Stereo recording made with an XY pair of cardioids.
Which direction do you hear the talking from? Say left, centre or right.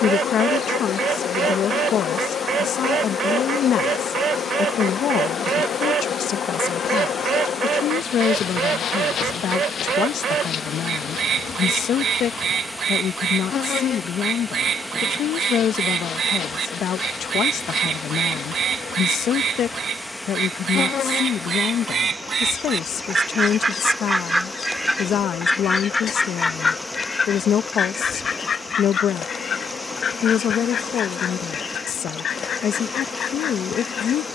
left.